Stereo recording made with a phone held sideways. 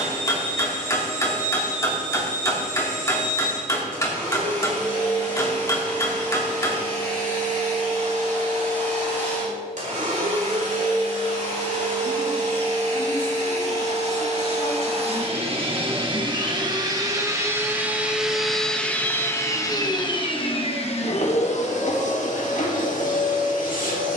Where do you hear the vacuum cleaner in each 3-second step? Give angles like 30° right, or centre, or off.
70° right, 70° right, 60° right, 60° right, 50° right, 30° right, 20° left, 60° left.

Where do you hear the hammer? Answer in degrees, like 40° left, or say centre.
20° left.